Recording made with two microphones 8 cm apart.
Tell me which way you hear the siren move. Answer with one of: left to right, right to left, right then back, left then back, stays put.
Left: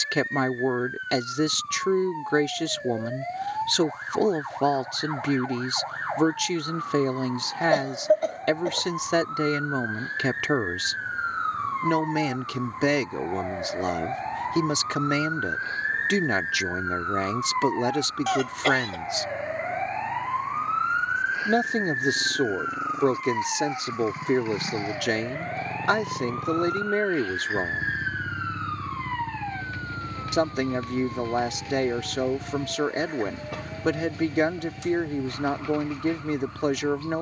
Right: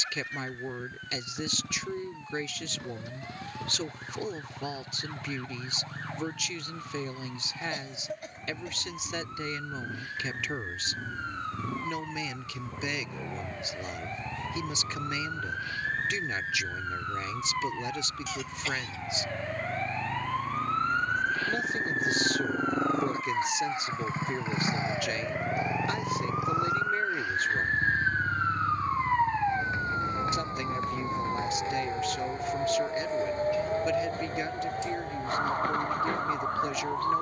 left to right.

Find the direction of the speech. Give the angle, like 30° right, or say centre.
70° left.